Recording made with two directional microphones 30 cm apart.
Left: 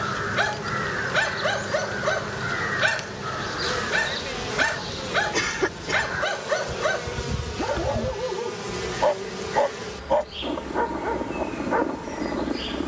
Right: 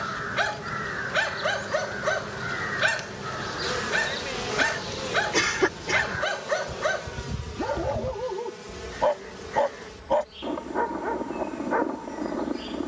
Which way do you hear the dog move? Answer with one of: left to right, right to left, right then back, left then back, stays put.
stays put.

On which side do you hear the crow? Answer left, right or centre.
left.